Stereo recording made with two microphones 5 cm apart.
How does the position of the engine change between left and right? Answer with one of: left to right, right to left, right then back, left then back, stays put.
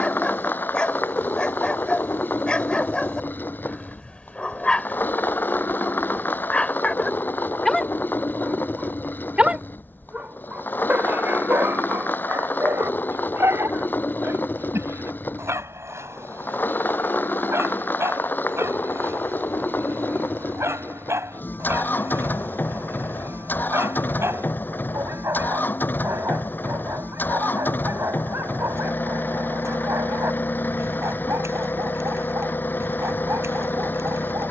stays put.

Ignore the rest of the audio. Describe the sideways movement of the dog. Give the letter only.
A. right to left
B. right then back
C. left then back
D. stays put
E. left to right
E.